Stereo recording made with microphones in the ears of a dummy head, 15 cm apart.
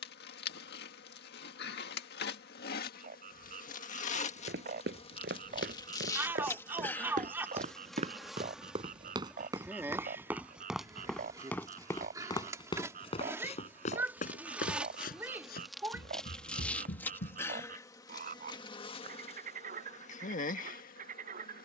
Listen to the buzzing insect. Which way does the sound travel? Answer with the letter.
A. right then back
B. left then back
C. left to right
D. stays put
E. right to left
A.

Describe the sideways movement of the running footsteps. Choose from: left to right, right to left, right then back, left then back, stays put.
right to left.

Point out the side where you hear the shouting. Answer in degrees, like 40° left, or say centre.
10° right.